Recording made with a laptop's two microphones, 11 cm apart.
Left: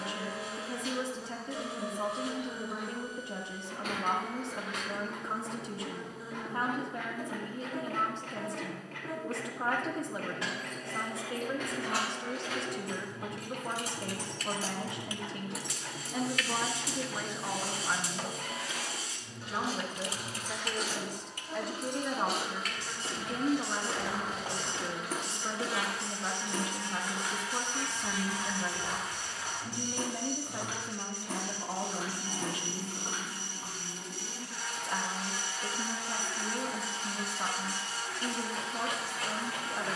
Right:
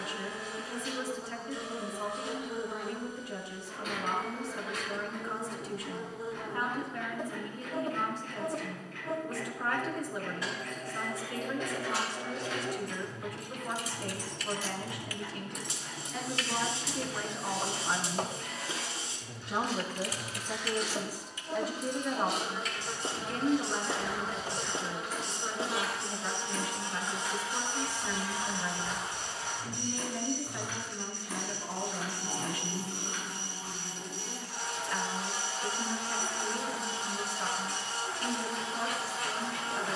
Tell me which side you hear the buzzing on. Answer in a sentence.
You can hear the buzzing on the right.